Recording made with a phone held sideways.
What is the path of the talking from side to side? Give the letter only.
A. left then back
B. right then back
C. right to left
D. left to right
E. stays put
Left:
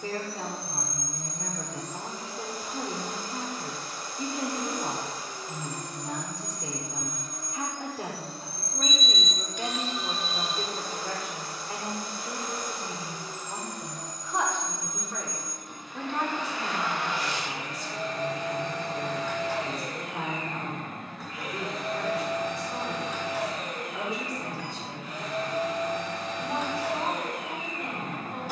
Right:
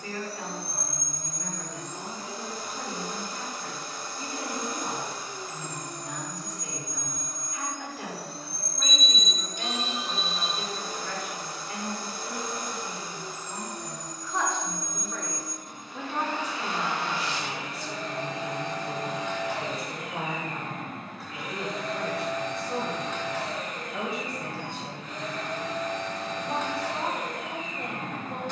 D.